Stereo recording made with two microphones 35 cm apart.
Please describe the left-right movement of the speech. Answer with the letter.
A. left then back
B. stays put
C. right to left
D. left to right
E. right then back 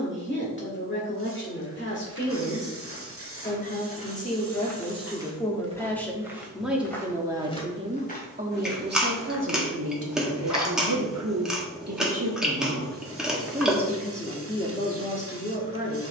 E.